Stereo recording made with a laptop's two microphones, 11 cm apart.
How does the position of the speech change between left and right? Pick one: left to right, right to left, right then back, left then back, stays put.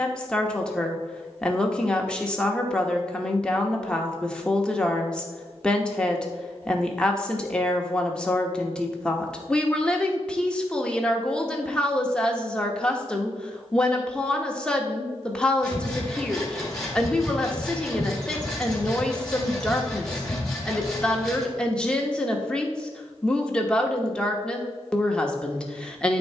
stays put.